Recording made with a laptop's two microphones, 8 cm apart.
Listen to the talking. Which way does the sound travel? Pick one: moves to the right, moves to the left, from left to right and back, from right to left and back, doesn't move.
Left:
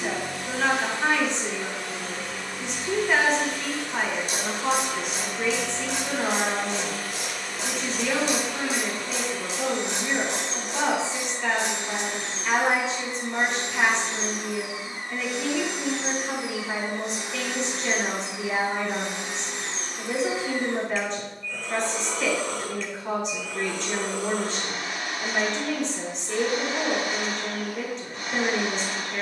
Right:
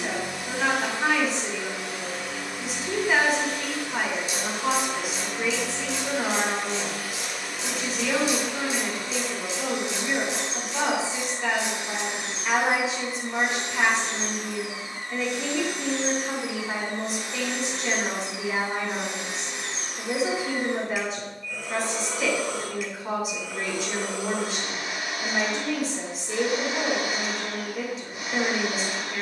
doesn't move.